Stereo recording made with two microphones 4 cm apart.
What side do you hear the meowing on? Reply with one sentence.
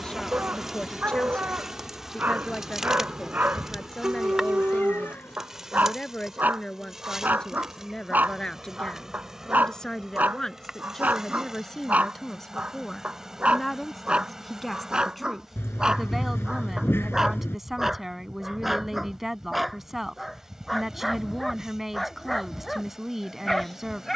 In this clip you hear the meowing on the left.